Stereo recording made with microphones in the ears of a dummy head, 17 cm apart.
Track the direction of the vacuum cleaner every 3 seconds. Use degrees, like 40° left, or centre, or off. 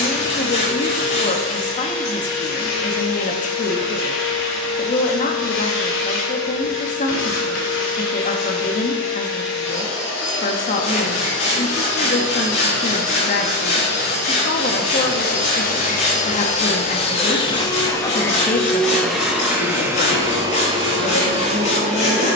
80° left, 80° left, 80° left, 70° left, 60° left, 40° left, 10° right, 40° right.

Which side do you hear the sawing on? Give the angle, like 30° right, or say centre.
40° left.